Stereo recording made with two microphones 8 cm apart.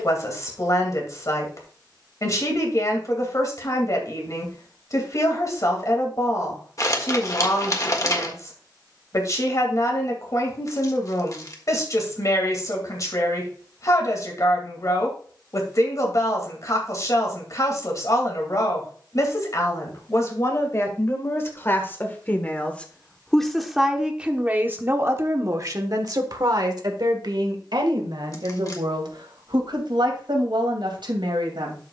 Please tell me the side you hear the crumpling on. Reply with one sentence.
You can hear the crumpling on the left.